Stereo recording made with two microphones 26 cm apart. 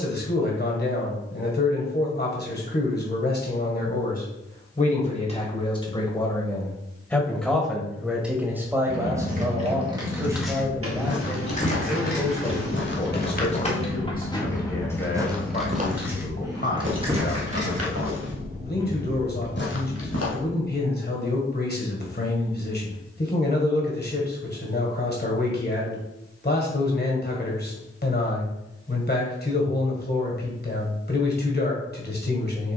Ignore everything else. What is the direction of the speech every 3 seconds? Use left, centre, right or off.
left, left, centre, centre, left, left, left, left, left, left, left.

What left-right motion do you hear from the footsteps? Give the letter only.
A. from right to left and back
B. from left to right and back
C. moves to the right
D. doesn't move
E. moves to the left
B.